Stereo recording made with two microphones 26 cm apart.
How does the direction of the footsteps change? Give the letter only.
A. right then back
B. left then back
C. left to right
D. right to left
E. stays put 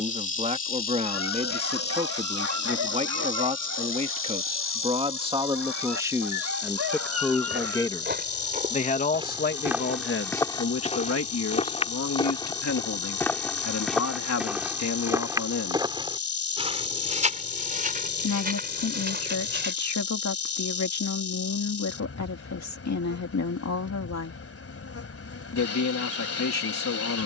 B.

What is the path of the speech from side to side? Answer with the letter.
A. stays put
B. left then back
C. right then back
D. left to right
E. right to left
E.